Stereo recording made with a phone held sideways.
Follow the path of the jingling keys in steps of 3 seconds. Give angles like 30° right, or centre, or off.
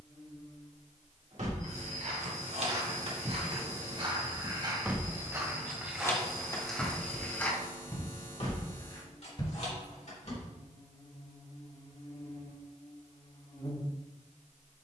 60° right, 30° right, 30° left, 60° left, off.